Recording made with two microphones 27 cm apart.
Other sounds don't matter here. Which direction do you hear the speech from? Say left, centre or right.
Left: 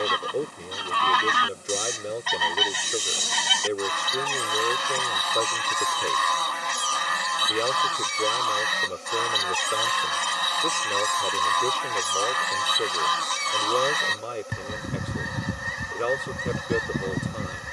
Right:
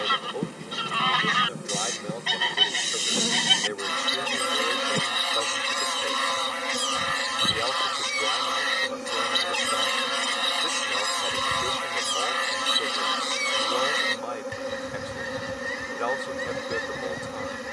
left.